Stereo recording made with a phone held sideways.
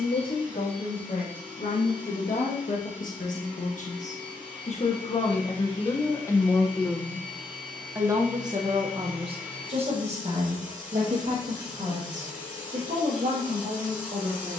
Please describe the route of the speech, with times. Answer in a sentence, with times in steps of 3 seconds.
In this clip you hear the speech on the left from 0 s, in the centre from 6 s and on the right from 9 s.